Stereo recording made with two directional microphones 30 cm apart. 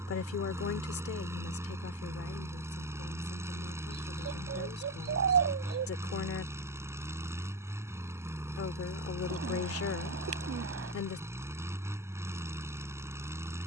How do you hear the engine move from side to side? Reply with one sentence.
You can hear the engine stay put.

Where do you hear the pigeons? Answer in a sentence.
You can hear the pigeons on the right.